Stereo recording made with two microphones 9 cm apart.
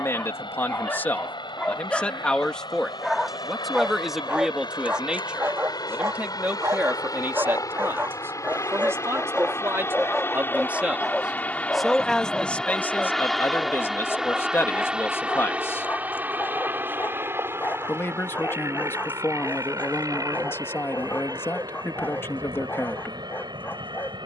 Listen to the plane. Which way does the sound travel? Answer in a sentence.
You can hear the plane go from the left side to the right.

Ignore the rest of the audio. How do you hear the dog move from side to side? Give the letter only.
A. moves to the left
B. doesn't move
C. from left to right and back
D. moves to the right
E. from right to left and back
C.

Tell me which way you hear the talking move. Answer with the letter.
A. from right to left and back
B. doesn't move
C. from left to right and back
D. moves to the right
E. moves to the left
C.